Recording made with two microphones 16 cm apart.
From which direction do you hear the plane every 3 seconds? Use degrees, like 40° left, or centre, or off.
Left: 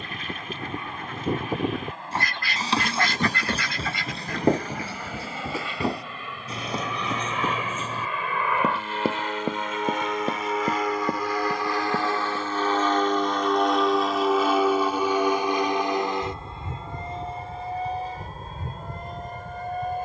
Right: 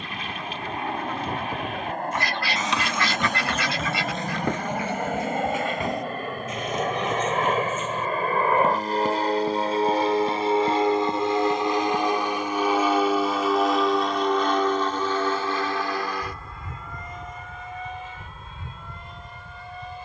70° right, 60° right, 50° right, 30° right, centre, 20° left, 40° left.